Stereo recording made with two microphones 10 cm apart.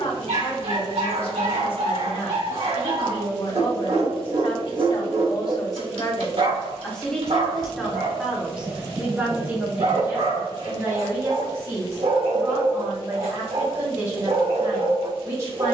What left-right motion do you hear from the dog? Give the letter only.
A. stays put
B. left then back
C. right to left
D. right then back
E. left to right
A.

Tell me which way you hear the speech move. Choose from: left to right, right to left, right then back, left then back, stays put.
left to right.